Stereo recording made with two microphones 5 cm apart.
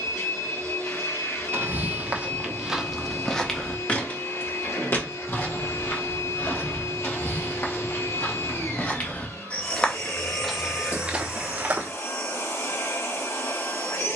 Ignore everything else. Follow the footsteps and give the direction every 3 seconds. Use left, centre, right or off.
right, left, left, centre, off.